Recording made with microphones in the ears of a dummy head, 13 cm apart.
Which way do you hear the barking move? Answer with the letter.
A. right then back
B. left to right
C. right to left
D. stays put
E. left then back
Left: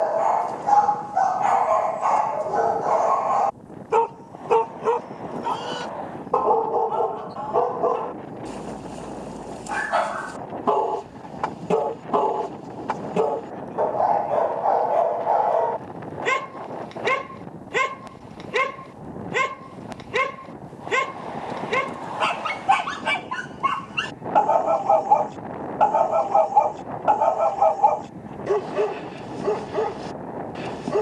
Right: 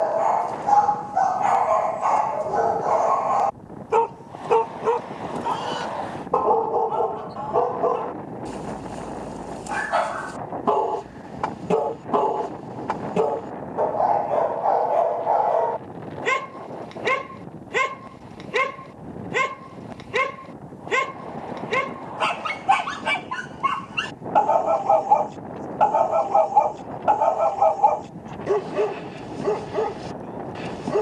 D.